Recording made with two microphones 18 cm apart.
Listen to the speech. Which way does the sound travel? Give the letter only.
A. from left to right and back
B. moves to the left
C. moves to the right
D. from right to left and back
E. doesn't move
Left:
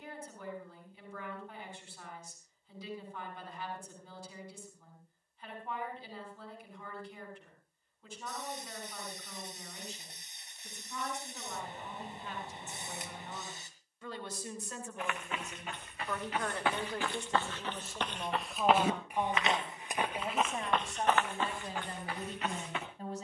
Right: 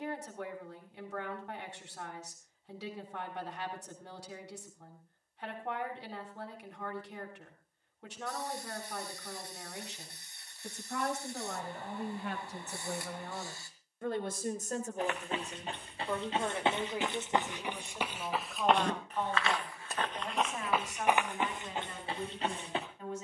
B.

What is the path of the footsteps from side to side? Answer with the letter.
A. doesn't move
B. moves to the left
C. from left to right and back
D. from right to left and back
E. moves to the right
D.